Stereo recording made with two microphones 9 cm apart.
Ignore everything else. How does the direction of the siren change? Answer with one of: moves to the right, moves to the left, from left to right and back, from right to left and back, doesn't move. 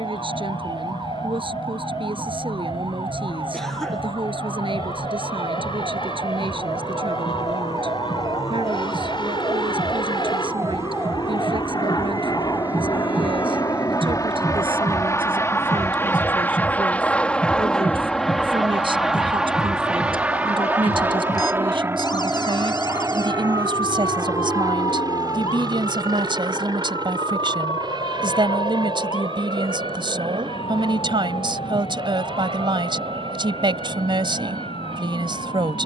moves to the left.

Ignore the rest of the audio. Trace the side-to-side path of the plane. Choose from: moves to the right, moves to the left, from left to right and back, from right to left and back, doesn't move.
moves to the right.